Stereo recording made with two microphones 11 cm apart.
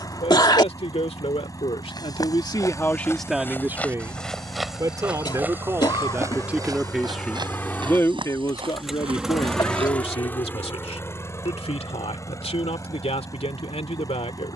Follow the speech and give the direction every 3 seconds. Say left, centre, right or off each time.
left, right, centre, left, left.